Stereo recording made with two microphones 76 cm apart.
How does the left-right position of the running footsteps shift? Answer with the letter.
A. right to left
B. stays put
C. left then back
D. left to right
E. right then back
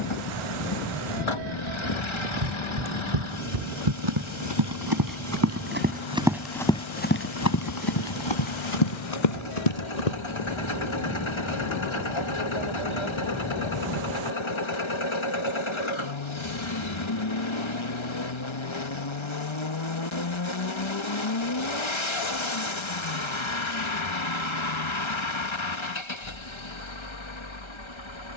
A.